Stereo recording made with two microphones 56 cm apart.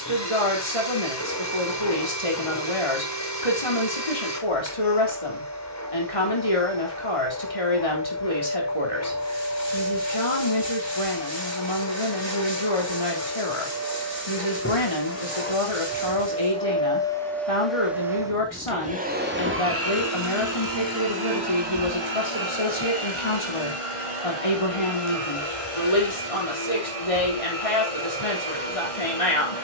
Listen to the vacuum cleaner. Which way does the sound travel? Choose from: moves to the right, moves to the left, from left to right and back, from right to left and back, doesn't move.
moves to the right.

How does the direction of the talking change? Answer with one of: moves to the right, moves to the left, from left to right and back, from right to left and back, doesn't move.
doesn't move.